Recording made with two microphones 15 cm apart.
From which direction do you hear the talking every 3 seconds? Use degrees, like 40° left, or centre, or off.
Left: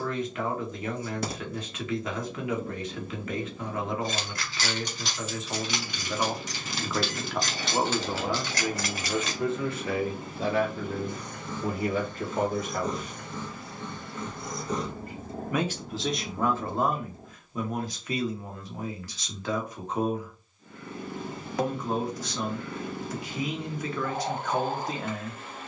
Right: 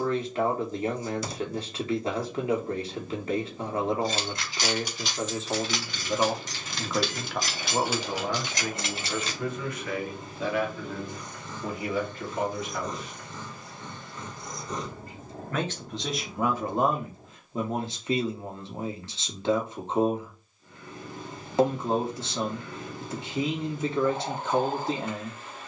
30° right, 30° right, centre, 30° left, 50° left, 10° right, 30° right, 30° right, 30° right.